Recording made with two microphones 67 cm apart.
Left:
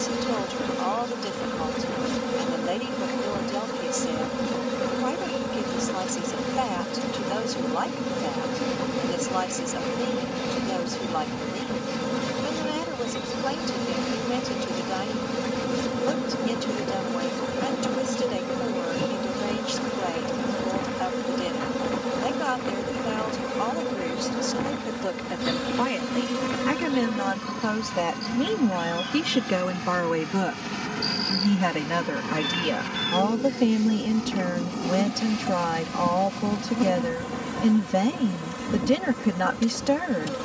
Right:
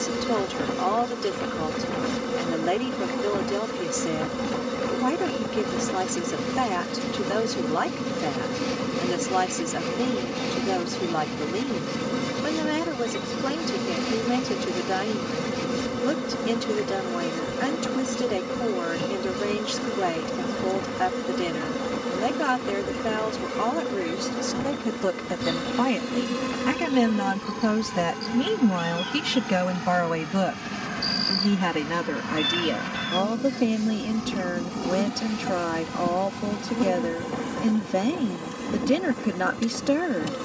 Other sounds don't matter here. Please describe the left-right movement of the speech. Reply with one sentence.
In this clip you hear the speech move to the left.